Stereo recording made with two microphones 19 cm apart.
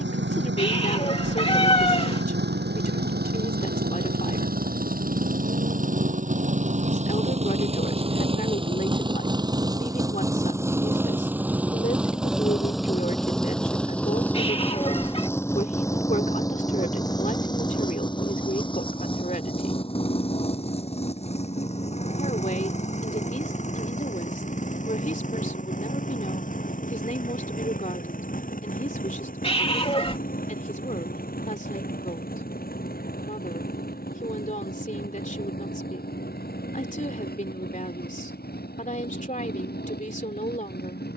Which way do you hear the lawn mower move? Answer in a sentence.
In this clip you hear the lawn mower go from the right side to the left.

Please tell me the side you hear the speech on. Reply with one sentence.
You can hear the speech on the left.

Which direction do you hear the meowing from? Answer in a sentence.
You can hear the meowing on the left.